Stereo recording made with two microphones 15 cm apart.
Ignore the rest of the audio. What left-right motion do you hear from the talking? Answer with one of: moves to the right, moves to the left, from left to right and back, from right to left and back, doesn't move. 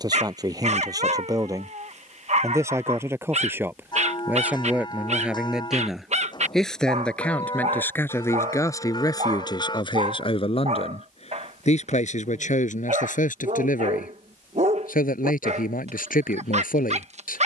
moves to the left.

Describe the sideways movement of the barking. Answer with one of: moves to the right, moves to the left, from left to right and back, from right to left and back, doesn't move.
doesn't move.